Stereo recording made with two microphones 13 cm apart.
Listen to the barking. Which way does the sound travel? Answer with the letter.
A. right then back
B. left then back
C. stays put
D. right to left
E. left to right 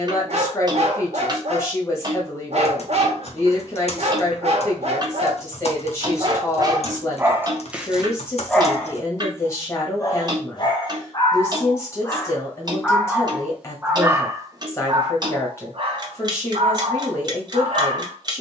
B.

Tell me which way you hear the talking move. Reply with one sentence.
In this clip you hear the talking stay in one place.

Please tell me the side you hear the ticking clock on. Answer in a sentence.
You can hear the ticking clock on the right.